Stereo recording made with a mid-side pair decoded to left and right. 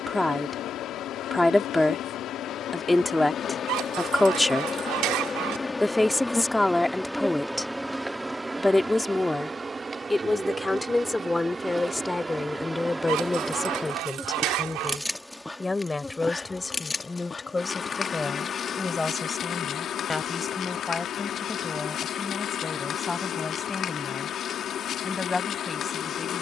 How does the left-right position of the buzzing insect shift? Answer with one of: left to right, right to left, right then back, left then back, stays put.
right then back.